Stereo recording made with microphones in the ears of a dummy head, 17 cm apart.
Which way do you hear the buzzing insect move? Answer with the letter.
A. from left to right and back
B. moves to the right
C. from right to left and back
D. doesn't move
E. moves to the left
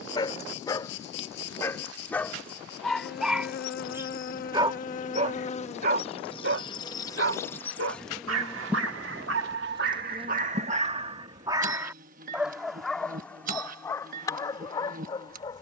B.